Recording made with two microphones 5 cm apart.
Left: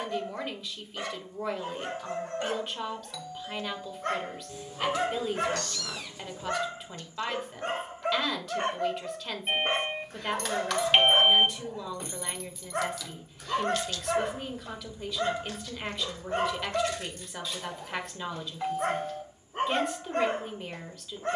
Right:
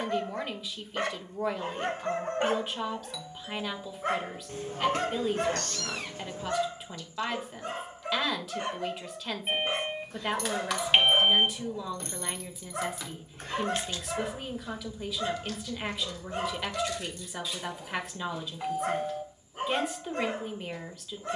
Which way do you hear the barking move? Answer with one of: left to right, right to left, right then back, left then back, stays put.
right to left.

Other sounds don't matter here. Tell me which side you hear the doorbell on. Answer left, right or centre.
centre.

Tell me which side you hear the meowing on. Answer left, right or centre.
right.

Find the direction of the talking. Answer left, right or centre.
centre.